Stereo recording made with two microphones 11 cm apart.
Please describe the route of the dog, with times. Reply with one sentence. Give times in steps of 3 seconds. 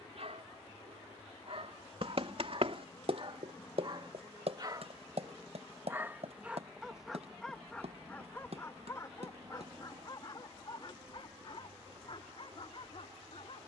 In this clip you hear the dog on the right from 0 s, in the centre from 6 s and on the left from 9 s.